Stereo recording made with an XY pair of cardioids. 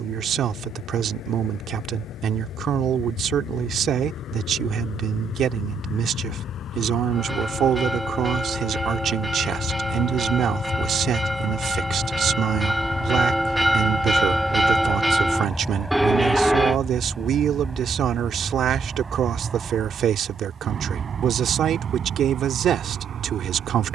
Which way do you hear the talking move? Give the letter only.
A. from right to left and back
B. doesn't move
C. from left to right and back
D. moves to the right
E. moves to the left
B.